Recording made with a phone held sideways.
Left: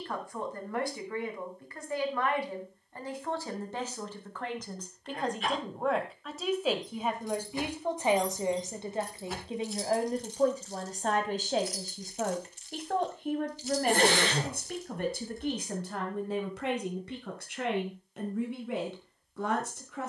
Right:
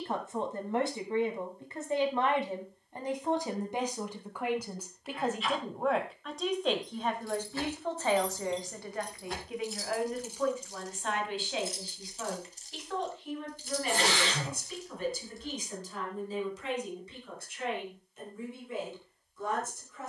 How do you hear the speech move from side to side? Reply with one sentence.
You can hear the speech travel towards the left.